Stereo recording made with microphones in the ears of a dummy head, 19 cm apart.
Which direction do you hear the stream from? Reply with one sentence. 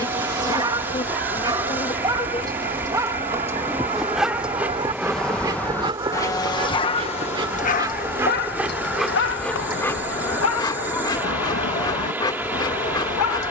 You can hear the stream in the centre.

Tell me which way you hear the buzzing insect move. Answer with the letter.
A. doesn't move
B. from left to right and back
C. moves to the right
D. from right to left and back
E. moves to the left
B.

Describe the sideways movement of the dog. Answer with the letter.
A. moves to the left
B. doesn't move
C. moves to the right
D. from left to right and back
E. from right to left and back
A.